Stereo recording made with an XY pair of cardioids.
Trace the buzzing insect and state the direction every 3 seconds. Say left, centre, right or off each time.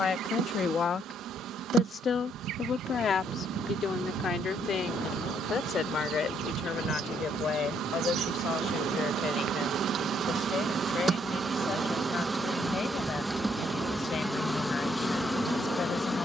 right, right, right, right, centre, centre.